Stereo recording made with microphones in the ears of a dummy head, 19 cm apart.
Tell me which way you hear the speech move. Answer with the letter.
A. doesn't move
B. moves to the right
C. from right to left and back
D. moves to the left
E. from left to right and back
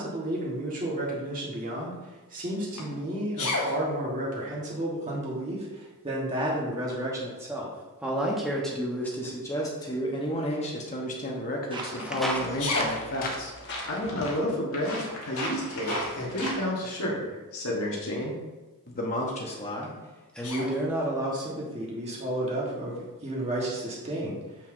C.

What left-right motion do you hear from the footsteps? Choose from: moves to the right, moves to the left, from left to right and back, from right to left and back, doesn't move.
moves to the left.